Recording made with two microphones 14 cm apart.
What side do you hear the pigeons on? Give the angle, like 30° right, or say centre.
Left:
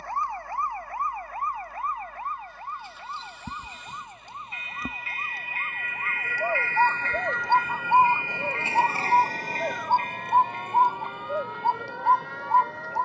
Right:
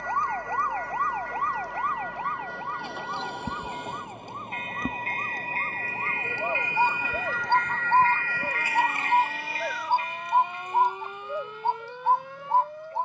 10° left.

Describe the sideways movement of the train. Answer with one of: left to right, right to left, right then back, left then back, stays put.
right to left.